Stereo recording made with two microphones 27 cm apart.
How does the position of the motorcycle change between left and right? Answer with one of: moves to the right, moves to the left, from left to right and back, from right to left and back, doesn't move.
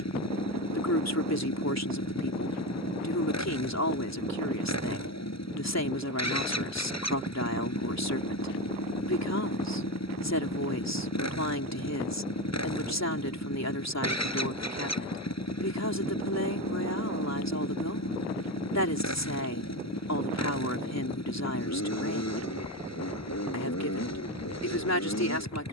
doesn't move.